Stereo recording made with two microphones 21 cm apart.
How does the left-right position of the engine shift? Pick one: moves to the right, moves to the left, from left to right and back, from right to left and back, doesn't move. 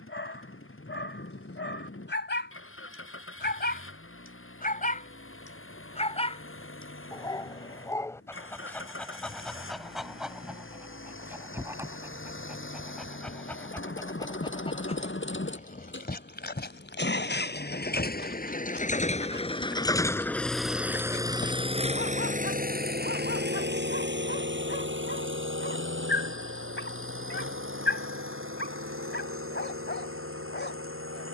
moves to the right.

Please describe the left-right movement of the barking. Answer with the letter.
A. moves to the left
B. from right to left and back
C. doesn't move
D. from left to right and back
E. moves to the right
D.